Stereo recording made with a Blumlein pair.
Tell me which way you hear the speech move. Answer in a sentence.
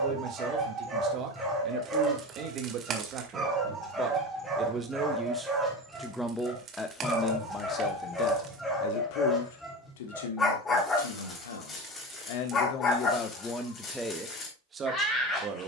You can hear the speech move from right to left and back again.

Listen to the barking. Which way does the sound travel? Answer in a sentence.
In this clip you hear the barking move to the left.